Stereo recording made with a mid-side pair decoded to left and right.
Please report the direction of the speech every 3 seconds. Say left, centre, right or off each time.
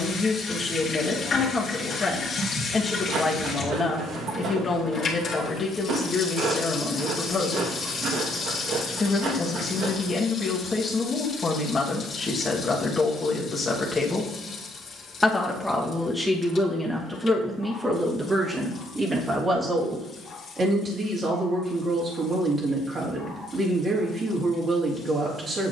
left, left, left, left, left, centre, right, right, right.